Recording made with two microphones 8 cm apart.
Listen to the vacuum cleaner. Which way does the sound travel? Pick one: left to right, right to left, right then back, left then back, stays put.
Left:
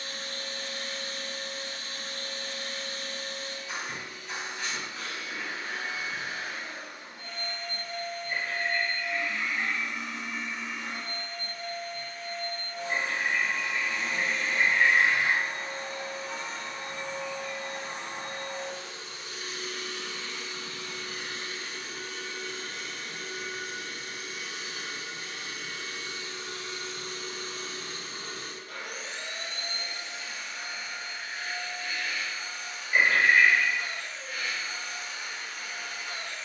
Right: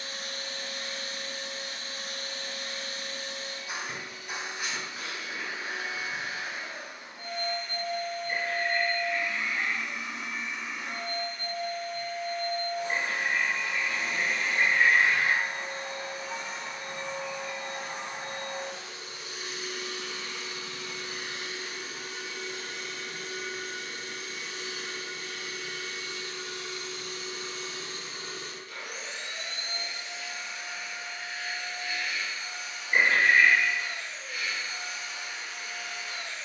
right to left.